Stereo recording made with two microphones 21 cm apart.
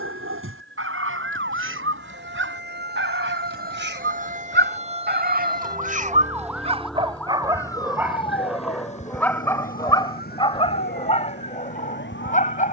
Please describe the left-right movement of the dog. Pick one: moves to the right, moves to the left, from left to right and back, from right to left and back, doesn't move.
moves to the left.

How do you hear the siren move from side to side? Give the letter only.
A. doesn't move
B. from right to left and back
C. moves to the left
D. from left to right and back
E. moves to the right
C.